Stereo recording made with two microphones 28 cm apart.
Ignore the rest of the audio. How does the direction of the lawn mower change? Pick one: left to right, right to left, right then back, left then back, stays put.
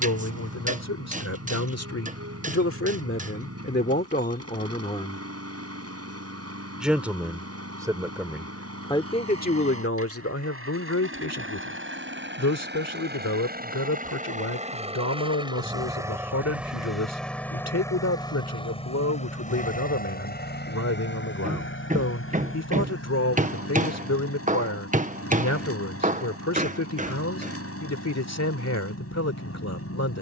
right to left.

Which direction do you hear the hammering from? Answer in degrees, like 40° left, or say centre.
30° right.